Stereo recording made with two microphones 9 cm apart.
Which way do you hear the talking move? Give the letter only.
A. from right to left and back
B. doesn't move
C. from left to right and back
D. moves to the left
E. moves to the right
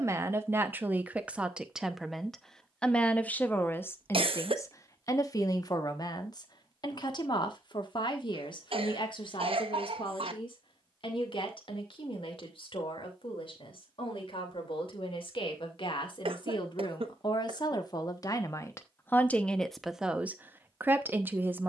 A.